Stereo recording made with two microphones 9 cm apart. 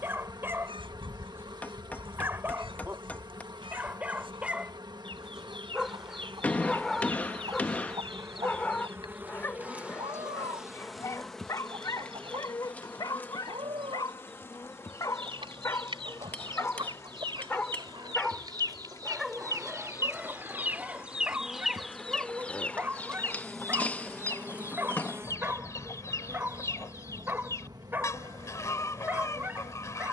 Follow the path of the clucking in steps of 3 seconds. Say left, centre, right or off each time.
right, right, right, right, right, right, right, centre, left, left.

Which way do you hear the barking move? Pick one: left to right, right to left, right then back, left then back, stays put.
left then back.